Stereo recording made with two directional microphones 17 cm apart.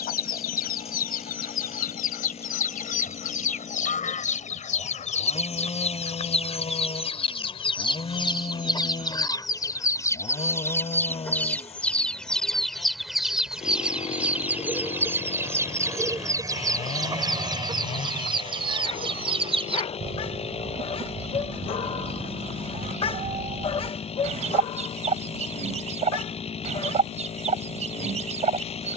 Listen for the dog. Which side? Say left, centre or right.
left.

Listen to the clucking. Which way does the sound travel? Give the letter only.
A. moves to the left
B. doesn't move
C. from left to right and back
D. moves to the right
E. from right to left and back
D.